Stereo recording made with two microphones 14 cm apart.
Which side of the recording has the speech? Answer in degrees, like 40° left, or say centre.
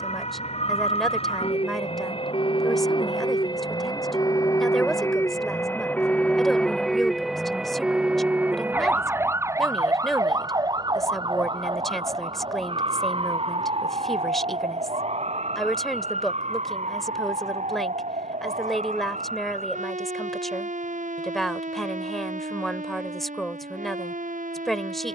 centre.